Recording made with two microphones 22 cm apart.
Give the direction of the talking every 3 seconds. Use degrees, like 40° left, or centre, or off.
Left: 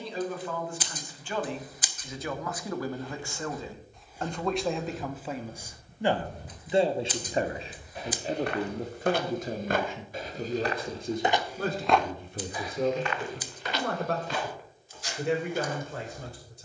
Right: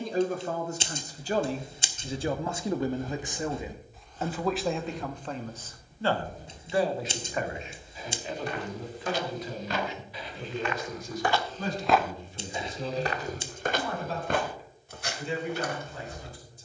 40° right, centre, 30° left, 50° left, 60° left, 70° left.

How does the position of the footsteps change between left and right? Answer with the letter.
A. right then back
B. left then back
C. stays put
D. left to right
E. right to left
B.